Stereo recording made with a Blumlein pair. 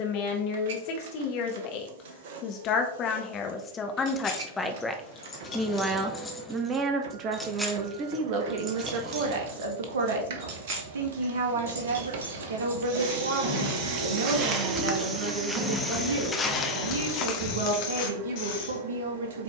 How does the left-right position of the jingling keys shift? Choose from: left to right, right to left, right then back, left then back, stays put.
right then back.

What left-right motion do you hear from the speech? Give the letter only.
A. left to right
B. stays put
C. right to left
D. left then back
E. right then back
A.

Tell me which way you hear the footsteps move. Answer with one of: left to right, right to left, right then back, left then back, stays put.
right to left.